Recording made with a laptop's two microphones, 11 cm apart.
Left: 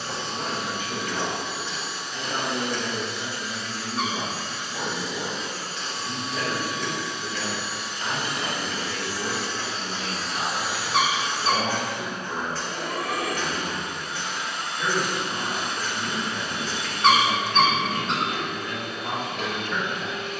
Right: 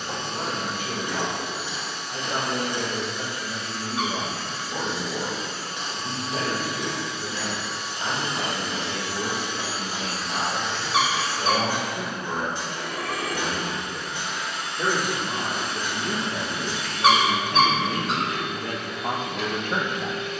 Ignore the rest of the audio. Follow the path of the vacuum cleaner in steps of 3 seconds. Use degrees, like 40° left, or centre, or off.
60° right, 50° right, 40° right, centre, 50° left, 50° left, 50° left.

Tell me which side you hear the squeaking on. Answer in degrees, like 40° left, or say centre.
centre.